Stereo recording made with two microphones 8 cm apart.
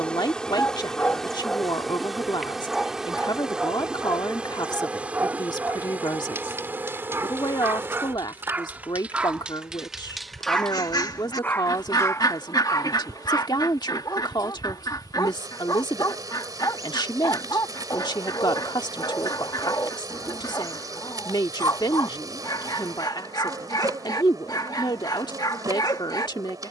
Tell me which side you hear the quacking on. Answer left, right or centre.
left.